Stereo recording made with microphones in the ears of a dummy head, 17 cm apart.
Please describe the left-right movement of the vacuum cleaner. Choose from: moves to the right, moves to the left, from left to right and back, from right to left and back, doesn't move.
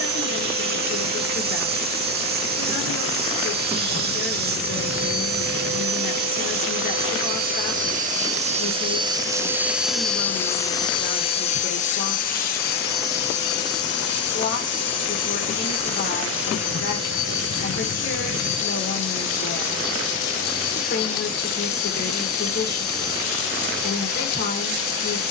moves to the left.